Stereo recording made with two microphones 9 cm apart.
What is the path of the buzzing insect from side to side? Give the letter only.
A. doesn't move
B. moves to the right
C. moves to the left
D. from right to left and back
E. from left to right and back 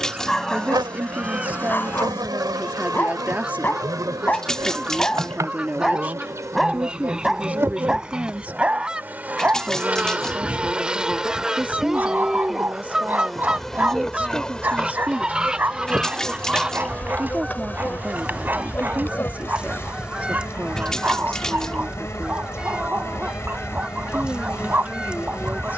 C.